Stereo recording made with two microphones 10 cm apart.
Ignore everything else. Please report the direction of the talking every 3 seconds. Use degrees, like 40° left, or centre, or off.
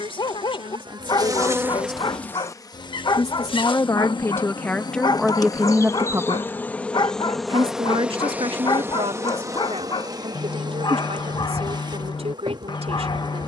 60° left, 10° left, 60° right, 80° right, 80° right.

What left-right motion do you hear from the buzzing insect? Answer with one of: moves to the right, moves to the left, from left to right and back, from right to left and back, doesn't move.
from right to left and back.